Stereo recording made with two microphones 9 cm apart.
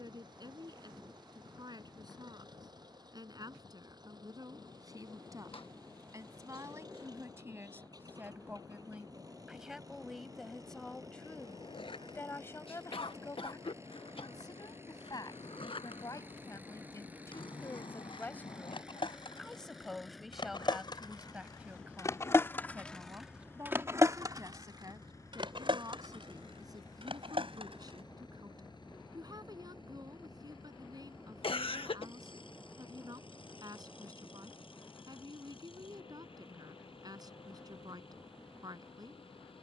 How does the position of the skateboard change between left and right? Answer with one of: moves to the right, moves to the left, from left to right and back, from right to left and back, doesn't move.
moves to the right.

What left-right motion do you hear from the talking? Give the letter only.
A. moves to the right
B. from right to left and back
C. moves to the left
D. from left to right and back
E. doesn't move
B.